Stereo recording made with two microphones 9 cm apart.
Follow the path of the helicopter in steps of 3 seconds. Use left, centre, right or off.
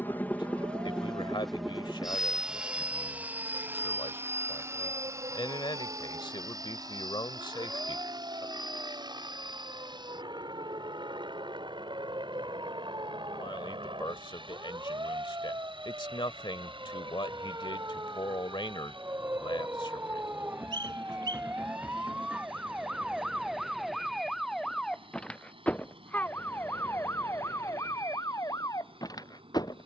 centre, right, right, right, right, right, right, right, right, right.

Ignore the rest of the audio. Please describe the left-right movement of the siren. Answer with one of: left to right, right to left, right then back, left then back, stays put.
right to left.